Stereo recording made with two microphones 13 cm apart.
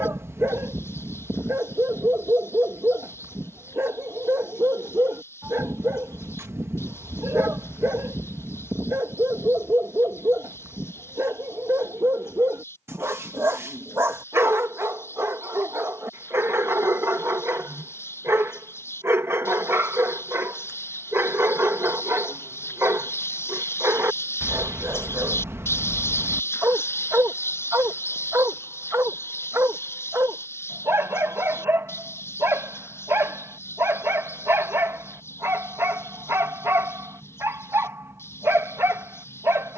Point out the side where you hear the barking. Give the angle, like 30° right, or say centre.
20° right.